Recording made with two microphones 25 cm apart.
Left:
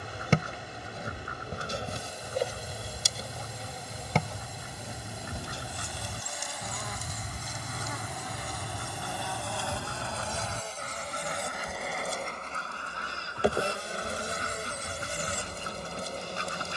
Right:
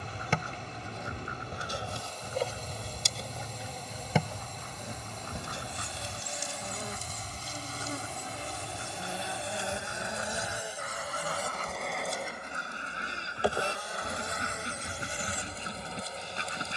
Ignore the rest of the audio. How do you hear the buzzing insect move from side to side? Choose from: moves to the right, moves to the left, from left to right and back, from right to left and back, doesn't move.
from left to right and back.